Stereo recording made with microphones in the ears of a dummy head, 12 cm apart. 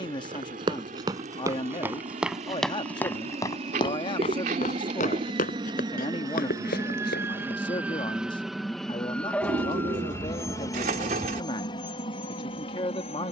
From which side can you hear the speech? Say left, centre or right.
left.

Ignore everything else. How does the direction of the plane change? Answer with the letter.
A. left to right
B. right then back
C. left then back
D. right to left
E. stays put
D.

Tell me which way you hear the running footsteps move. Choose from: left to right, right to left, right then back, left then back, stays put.
right to left.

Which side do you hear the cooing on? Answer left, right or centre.
right.